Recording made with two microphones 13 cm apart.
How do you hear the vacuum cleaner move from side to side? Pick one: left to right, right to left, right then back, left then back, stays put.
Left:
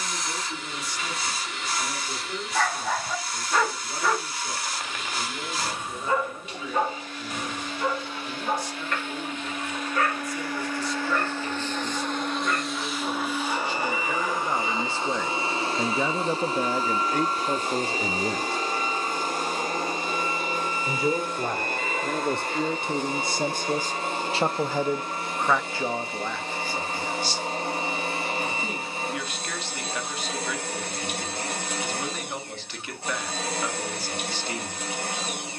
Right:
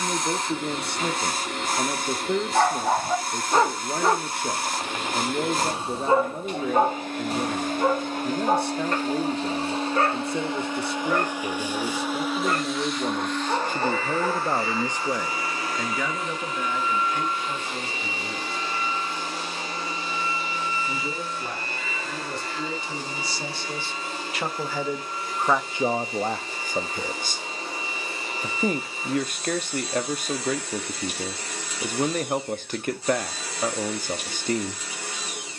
right to left.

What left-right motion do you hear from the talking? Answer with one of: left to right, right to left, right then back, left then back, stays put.
left then back.